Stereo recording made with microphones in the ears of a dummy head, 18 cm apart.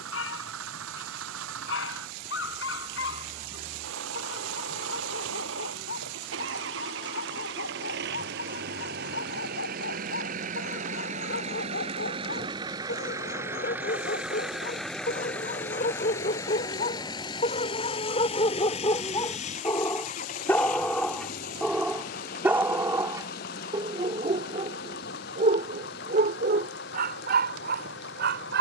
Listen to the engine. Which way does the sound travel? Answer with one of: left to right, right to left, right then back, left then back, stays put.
right to left.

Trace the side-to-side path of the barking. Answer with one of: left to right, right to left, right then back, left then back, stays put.
left to right.